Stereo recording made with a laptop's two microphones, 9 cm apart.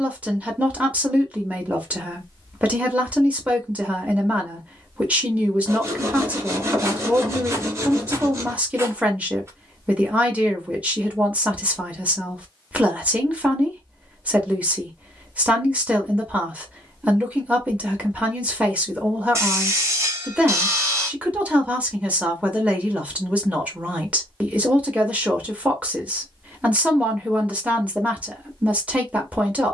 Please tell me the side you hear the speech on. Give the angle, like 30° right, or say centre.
10° right.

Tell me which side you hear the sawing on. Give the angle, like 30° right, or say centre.
30° right.